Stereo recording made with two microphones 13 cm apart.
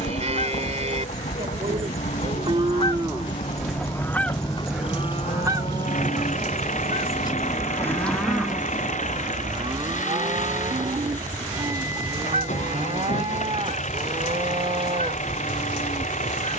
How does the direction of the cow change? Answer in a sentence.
In this clip you hear the cow move from right to left and back again.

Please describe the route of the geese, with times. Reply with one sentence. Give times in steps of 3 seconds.
In this clip you hear the geese on the left from 0 s, in the centre from 3 s and on the right from 6 s.